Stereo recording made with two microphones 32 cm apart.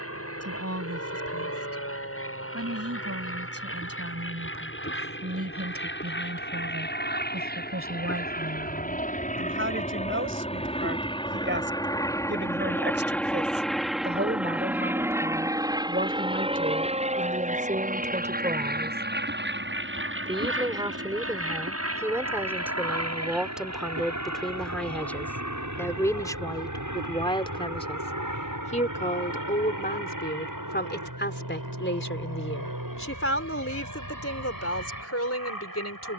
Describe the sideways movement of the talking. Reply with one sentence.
You can hear the talking go from the right side to the left.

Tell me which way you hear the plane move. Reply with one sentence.
You can hear the plane move from left to right.